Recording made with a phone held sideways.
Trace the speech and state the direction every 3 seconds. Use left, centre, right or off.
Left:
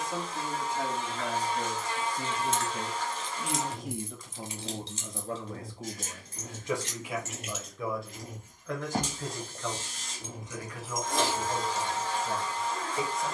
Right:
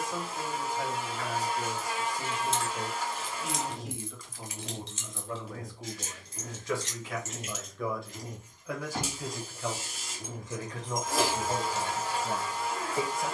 left, left, centre, right, right.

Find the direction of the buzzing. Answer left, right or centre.
centre.